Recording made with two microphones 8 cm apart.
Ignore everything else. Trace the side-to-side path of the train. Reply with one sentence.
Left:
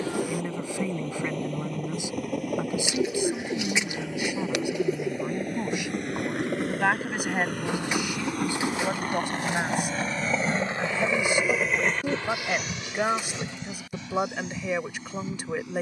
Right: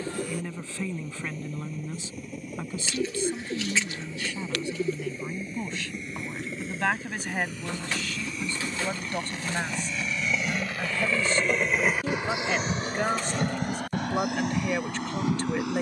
In this clip you hear the train move from left to right.